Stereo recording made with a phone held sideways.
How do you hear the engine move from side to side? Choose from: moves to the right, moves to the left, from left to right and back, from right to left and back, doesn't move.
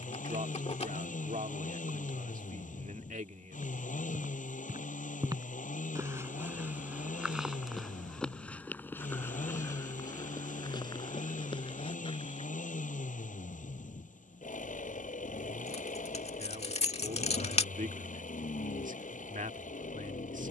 doesn't move.